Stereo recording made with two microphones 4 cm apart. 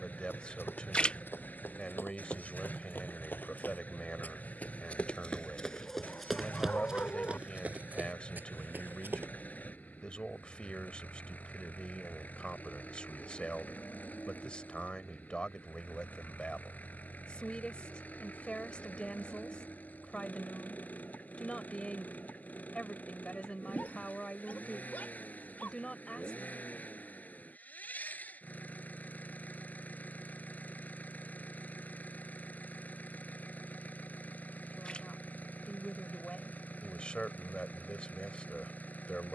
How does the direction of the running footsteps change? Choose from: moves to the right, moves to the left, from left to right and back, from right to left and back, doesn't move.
moves to the right.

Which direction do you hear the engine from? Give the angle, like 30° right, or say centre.
40° left.